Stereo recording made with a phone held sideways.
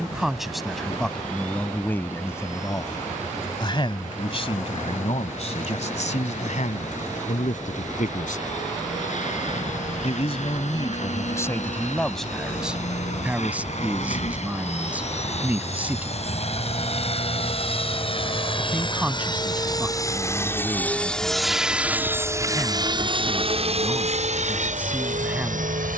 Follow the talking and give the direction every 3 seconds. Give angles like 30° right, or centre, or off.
10° left, 50° left, 70° left, 30° left, 10° right, 10° right, 10° right, 10° right, 10° right.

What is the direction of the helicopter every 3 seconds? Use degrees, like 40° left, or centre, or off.
70° left, 70° left, 70° left, 60° left, 60° left, 50° left, 30° left, 20° right, 60° right.